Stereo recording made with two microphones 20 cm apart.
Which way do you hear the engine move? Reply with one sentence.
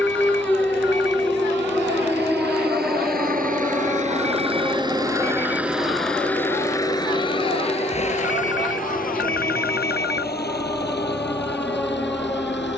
In this clip you hear the engine move to the left.